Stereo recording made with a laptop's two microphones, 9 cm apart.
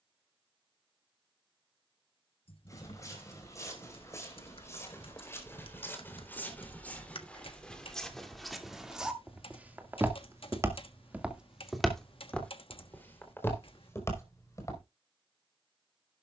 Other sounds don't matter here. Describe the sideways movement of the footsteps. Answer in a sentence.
In this clip you hear the footsteps move from left to right and back again.